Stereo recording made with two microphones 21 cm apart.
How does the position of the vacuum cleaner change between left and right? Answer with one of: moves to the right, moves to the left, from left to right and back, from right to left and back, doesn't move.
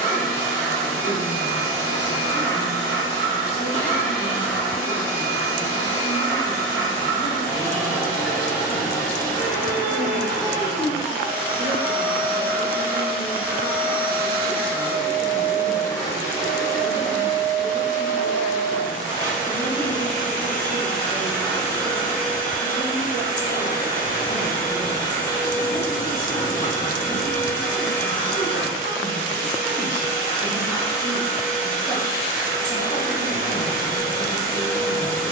doesn't move.